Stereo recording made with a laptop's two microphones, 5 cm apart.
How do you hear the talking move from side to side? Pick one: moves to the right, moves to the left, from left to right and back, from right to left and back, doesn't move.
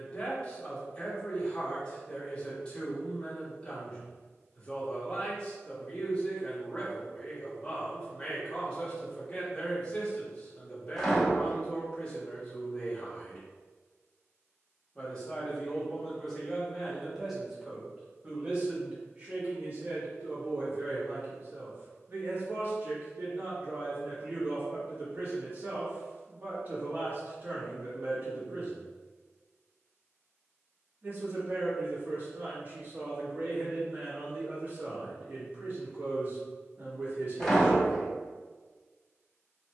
moves to the right.